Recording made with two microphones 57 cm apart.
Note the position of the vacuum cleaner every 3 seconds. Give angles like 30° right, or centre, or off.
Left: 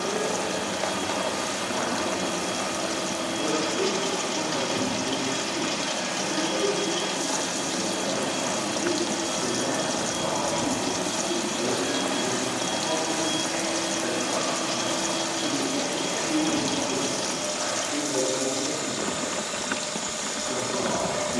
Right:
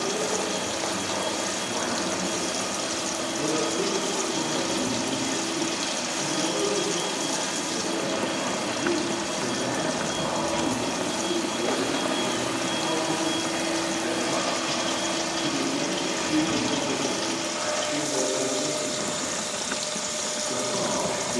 80° left, 70° left, 60° left, 40° left, centre, 40° right, 50° right.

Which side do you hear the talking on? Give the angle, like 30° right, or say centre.
centre.